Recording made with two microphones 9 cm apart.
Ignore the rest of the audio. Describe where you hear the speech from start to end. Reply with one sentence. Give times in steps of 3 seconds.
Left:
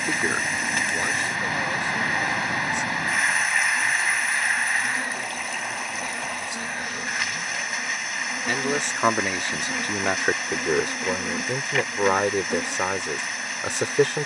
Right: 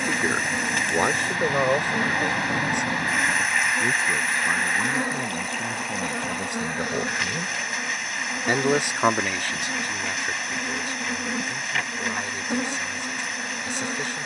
You can hear the speech on the right from 0 s and on the left from 9 s.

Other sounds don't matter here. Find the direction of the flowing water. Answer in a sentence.
In this clip you hear the flowing water in the centre.